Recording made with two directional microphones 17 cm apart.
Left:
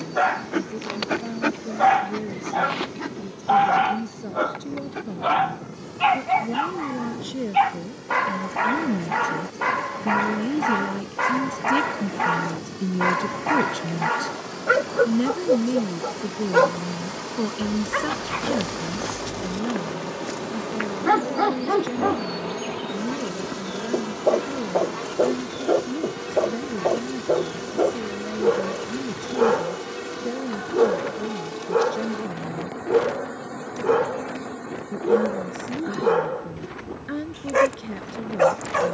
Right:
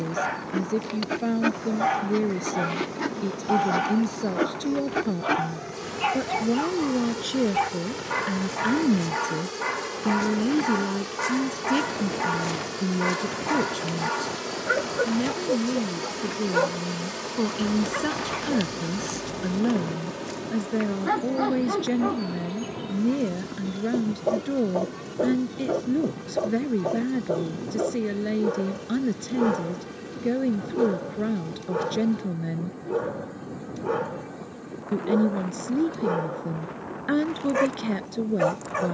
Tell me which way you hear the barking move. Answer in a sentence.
You can hear the barking stay in one place.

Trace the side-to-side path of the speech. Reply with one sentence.
You can hear the speech go left and come back.